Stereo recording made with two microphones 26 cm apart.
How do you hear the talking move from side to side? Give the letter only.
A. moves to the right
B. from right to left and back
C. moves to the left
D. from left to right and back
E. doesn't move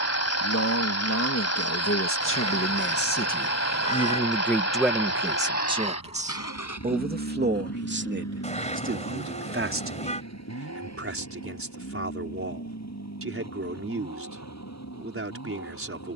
A.